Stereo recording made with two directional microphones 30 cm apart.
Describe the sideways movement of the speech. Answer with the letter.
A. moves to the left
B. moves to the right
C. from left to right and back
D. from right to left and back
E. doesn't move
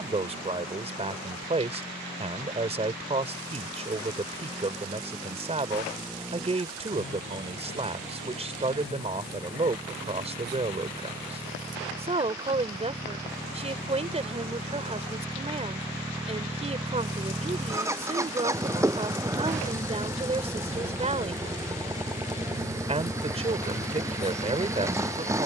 E.